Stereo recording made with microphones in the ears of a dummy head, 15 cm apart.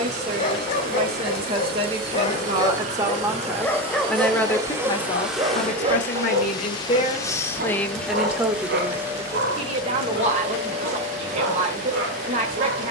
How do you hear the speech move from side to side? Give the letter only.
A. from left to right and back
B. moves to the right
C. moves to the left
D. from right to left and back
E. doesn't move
D.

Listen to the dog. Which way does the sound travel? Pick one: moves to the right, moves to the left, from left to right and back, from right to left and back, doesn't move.
moves to the right.